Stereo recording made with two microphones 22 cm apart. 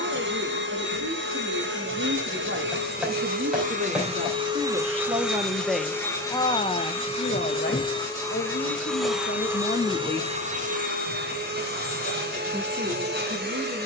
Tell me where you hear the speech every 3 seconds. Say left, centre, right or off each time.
right, right, left, left, right.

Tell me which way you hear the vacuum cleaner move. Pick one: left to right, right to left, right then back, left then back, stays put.
left then back.